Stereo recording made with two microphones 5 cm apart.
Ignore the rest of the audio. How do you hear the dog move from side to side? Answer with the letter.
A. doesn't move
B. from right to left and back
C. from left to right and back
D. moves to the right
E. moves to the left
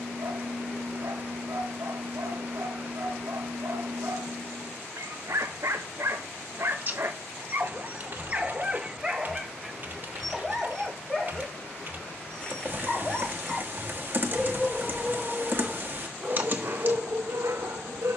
B.